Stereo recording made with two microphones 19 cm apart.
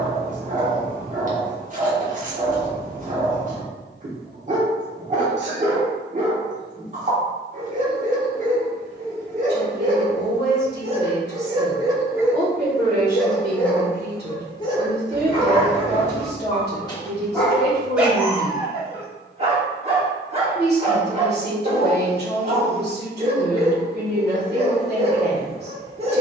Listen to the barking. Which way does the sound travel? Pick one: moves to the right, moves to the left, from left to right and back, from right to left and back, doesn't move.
from right to left and back.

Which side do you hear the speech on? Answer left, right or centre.
right.